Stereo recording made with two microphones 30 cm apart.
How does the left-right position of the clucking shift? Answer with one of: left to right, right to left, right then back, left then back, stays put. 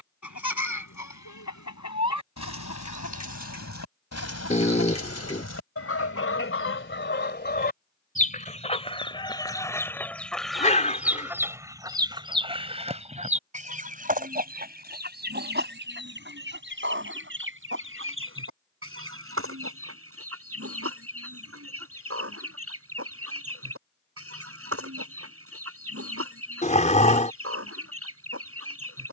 left to right.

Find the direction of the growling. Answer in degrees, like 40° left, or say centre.
20° left.